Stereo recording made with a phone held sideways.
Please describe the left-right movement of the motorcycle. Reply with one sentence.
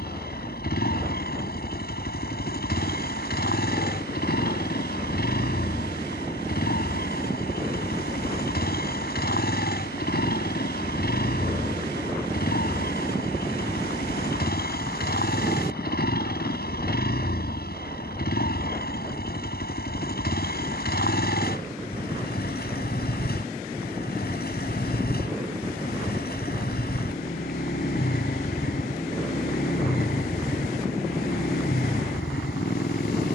You can hear the motorcycle stay in one place.